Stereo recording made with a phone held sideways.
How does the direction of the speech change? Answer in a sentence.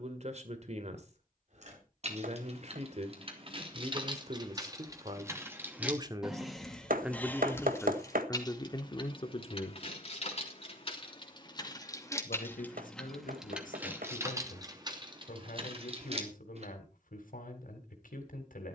In this clip you hear the speech move from right to left.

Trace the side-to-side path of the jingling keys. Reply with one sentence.
In this clip you hear the jingling keys go left and come back.